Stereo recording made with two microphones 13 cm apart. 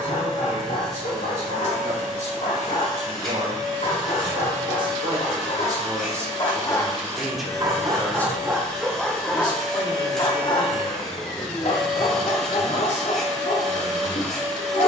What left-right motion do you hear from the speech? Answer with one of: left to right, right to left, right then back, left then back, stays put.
right to left.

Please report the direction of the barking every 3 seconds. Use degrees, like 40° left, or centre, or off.
70° left, 70° left, centre, 30° left, 60° left.